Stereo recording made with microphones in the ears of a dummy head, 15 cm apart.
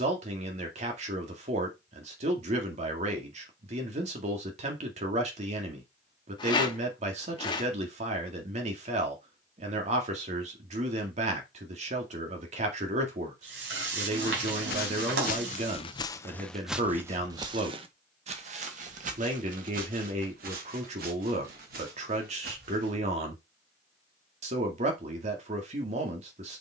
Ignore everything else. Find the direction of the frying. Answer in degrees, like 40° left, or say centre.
70° right.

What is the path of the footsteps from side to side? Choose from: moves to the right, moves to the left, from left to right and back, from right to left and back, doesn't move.
moves to the right.